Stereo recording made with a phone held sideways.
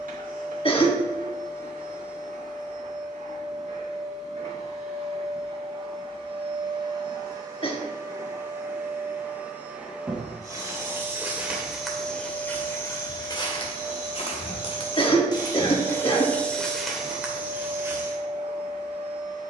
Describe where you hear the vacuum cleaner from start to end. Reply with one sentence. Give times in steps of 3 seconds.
You can hear the vacuum cleaner on the right from 0 s, in the centre from 9 s and on the right from 15 s.